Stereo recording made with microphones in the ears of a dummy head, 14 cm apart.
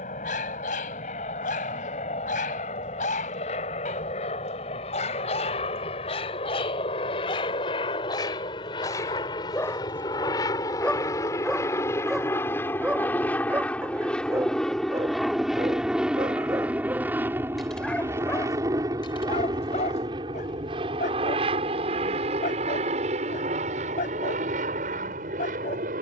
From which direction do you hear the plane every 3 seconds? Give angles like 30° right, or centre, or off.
50° left, 50° left, 40° left, 30° left, 10° left, 10° right, 30° right, 40° right, 50° right.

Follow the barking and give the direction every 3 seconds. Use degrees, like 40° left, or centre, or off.
60° left, 50° left, 30° left, 10° left, 10° right, 20° right, 40° left, 60° left, 60° left.